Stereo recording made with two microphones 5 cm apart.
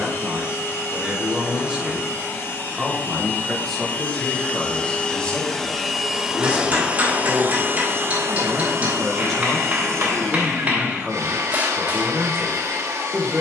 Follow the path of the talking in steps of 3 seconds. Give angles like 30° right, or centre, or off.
10° right, 10° left, 20° left, 10° right, 20° right.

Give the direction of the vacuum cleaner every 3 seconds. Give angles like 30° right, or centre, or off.
40° left, 20° left, 40° right, 80° right, 80° right.